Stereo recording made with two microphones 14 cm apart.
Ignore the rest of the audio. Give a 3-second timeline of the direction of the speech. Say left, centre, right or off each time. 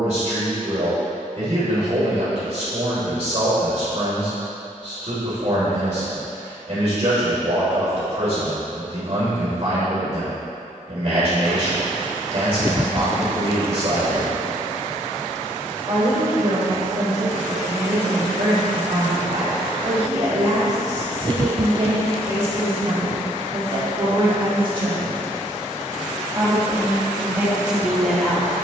right, right, right, right, right, right, right, right, right, centre.